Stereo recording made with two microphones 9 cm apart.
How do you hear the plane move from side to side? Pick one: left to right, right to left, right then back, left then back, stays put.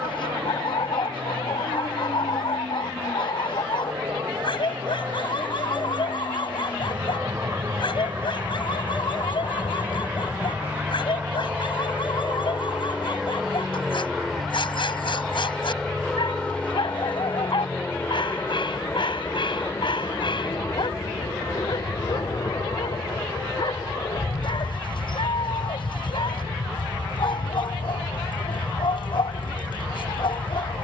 right to left.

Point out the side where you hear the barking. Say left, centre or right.
left.